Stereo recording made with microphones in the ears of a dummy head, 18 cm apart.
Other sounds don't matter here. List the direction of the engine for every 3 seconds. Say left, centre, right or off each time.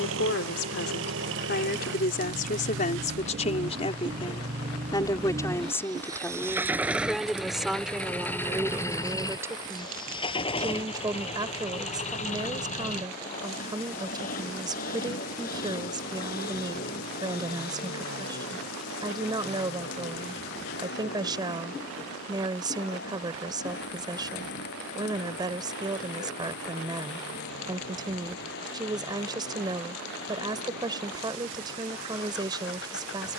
right, right, centre, left, left, left, left, left, left, left, left.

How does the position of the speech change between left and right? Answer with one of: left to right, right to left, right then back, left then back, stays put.
left to right.